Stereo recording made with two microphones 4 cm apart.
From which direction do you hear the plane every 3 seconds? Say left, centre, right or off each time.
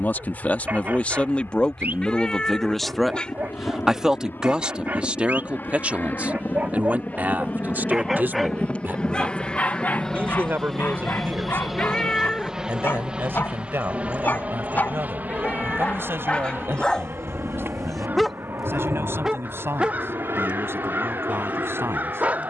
left, left, left, centre, right, right, right, right.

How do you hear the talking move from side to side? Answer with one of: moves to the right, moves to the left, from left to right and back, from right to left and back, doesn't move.
moves to the right.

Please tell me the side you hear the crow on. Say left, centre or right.
right.